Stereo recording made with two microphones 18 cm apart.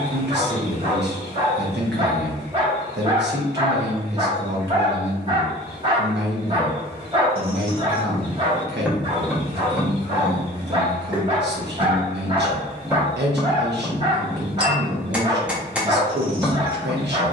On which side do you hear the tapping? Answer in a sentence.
You can hear the tapping in the centre.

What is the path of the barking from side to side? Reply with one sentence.
You can hear the barking stay put.